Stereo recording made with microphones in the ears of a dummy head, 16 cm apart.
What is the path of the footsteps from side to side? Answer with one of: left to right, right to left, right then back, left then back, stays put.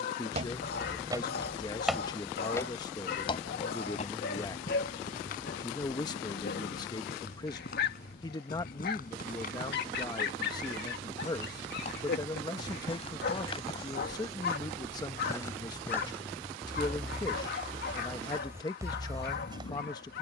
left then back.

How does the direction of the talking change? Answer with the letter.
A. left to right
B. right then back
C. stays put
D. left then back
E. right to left
C.